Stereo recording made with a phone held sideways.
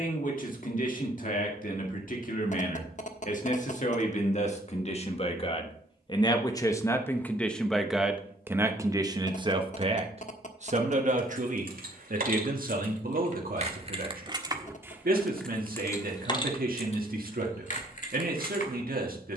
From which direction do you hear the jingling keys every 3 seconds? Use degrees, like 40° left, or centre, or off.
off, off, off, 60° right, 40° right, 30° left, 60° left.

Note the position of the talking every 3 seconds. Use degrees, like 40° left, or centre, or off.
60° left, 40° left, 10° left, 40° right, 60° right, 60° right, 60° right.